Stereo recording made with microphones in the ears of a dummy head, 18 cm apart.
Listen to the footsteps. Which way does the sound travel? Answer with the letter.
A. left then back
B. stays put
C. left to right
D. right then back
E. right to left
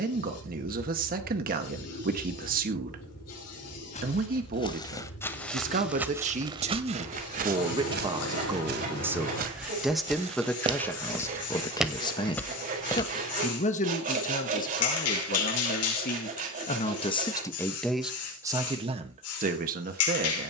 D.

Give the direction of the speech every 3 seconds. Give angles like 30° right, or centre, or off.
40° right, 40° right, 30° right, 10° left, 40° left, 30° left, 30° right.